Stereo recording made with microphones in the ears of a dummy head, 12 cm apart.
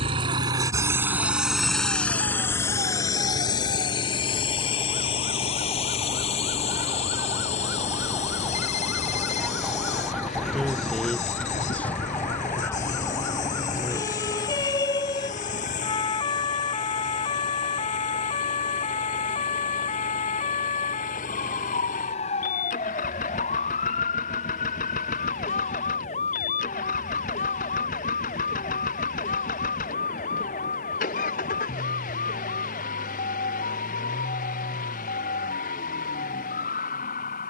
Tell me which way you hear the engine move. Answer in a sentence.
In this clip you hear the engine move to the left.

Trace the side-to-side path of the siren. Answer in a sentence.
In this clip you hear the siren move to the left.